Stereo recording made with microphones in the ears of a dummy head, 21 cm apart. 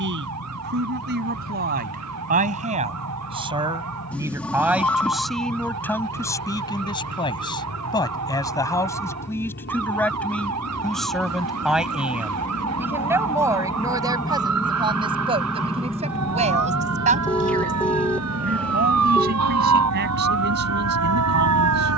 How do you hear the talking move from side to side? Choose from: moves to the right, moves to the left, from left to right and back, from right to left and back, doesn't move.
from right to left and back.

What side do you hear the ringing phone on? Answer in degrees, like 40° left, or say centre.
10° left.